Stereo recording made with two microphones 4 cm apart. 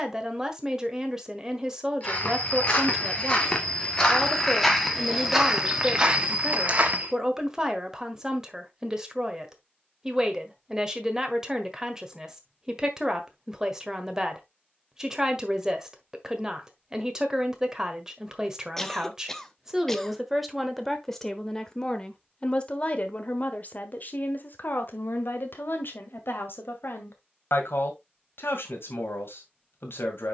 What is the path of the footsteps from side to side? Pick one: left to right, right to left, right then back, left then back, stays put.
left to right.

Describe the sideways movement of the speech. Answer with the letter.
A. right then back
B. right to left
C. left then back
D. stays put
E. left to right
B.